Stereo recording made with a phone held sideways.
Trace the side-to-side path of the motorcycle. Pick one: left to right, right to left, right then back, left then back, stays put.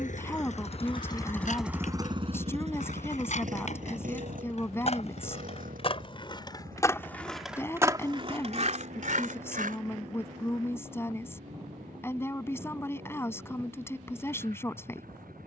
left to right.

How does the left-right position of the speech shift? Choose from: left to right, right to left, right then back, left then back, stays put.
stays put.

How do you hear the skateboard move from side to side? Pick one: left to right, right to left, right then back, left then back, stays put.
left to right.